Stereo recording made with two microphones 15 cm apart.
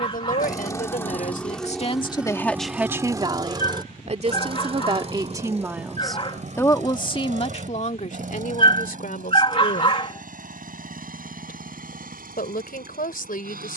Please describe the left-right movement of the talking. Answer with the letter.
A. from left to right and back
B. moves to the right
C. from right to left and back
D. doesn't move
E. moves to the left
A.